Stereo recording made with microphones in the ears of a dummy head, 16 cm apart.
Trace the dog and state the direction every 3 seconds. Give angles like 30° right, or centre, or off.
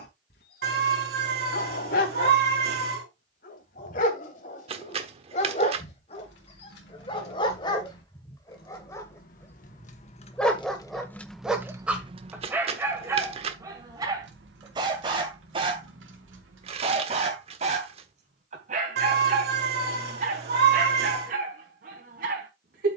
60° left, 40° left, 30° left, centre, 20° right, 40° right, 50° right, 50° right.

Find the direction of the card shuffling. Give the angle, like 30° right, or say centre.
40° right.